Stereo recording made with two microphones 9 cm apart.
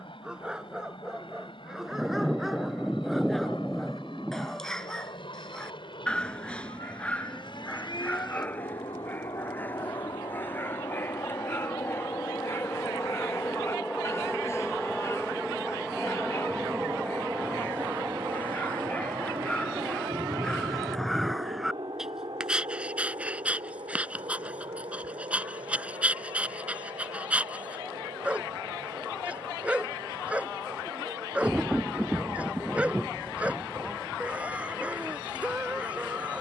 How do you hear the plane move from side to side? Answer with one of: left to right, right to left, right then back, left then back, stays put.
left to right.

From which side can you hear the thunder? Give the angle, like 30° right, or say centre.
10° right.